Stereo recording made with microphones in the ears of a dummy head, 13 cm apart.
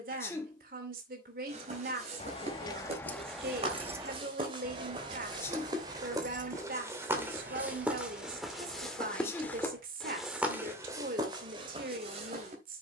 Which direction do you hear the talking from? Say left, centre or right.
right.